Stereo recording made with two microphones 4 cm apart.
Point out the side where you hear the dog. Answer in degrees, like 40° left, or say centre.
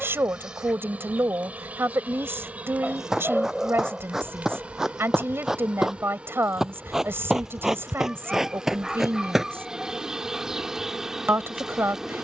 10° right.